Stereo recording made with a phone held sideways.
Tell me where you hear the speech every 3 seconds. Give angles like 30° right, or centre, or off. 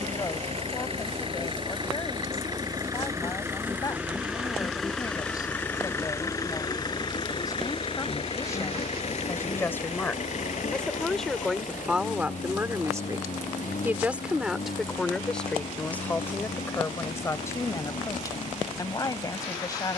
30° left, 30° left, 20° left, 10° left, 10° right, 10° left, 30° left.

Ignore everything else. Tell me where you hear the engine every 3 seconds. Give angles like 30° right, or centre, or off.
40° right, centre, 40° left, 60° left, 70° left, 80° left, 80° left.